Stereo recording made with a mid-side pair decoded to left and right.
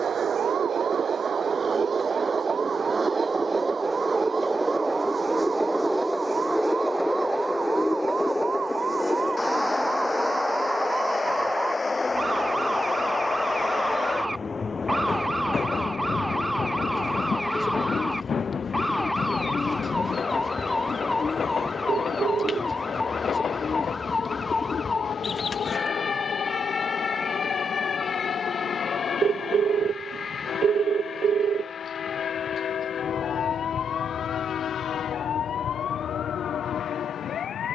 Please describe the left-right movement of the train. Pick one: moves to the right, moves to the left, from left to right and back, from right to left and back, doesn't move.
moves to the left.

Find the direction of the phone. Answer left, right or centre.
right.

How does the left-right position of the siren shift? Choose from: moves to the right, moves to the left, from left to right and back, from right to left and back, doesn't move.
moves to the left.